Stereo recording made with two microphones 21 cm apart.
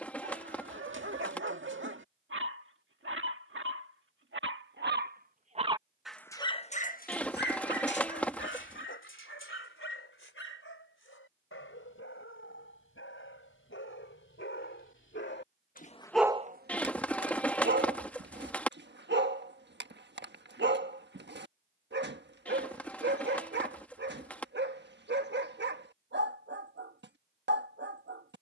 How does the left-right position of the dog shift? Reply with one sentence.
In this clip you hear the dog move from right to left and back again.